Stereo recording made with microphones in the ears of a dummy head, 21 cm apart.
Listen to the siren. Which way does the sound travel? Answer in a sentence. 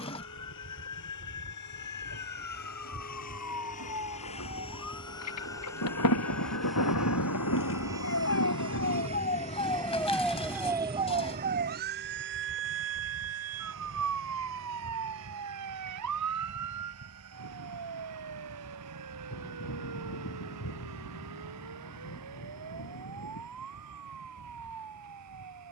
You can hear the siren travel towards the right.